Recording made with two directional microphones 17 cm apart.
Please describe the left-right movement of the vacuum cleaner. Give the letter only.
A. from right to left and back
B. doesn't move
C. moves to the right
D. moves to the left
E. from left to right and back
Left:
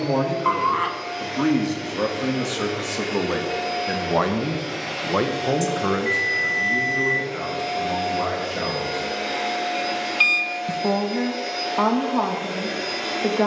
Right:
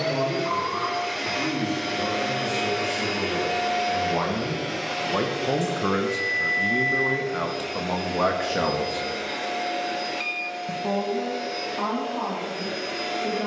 D.